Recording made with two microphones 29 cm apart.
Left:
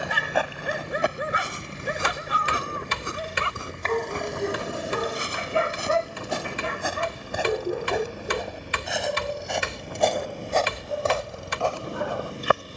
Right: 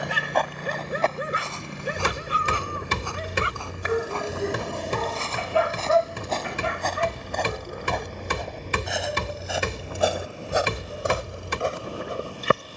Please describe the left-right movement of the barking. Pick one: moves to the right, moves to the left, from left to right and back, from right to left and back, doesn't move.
moves to the left.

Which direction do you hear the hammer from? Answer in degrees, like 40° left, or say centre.
50° right.